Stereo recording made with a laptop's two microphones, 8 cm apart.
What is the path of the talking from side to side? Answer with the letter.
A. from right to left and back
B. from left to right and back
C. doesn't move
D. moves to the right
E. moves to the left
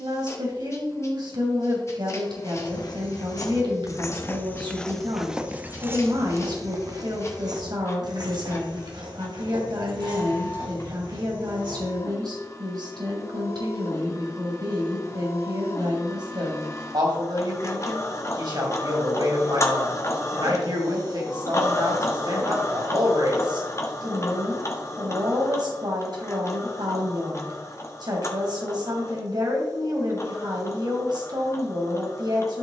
C.